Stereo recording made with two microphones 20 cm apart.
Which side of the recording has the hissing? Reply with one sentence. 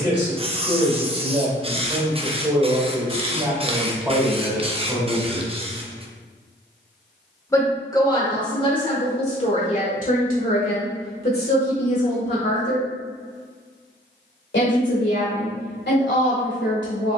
In this clip you hear the hissing on the right.